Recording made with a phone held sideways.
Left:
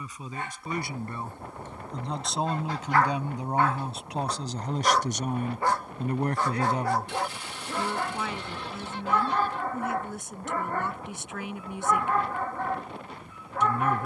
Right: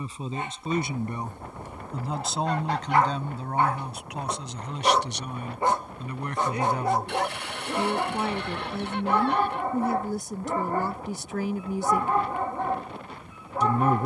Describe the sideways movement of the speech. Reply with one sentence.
In this clip you hear the speech move from right to left and back again.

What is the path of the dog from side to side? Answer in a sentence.
In this clip you hear the dog stay in one place.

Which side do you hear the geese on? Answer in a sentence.
In this clip you hear the geese on the right.